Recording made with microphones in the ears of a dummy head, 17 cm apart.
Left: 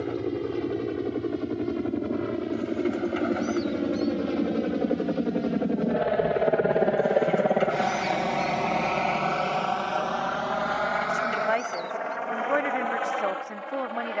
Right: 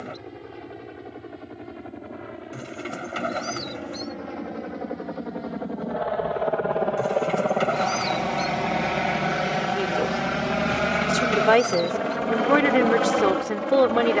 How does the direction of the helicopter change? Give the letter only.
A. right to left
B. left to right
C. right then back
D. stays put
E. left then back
B.